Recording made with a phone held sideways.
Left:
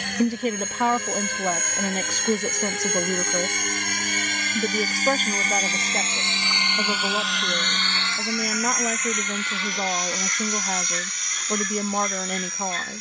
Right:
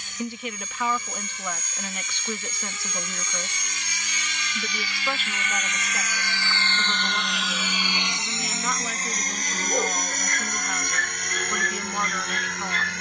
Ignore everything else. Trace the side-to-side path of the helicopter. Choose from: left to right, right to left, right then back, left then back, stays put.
left to right.